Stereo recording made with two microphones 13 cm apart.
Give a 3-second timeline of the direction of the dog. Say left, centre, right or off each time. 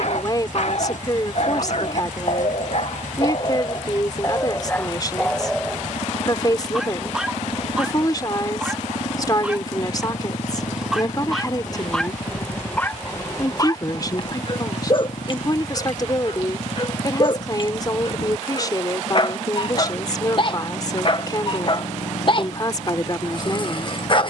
left, left, centre, centre, left, left, left, left.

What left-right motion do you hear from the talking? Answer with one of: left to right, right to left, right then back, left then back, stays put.
stays put.